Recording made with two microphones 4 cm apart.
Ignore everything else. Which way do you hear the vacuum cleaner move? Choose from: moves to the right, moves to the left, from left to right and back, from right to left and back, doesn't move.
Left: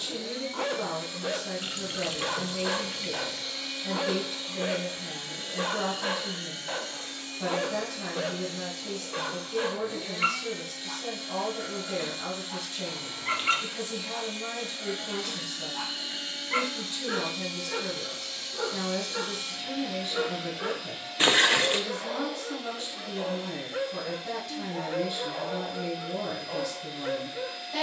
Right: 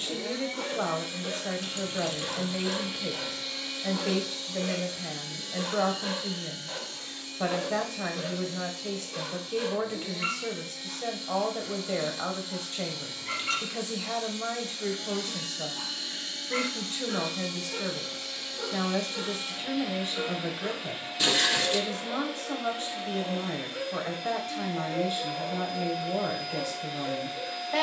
from right to left and back.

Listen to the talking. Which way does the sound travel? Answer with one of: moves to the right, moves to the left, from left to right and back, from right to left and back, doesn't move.
doesn't move.